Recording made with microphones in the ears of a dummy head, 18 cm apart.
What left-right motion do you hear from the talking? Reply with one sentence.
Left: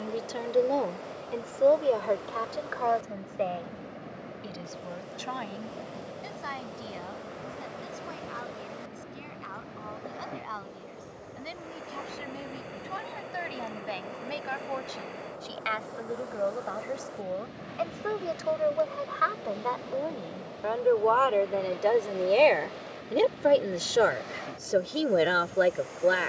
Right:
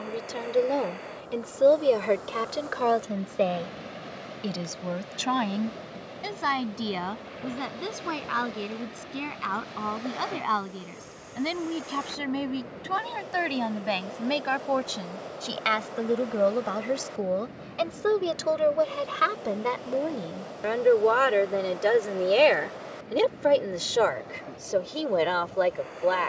You can hear the talking go right and come back.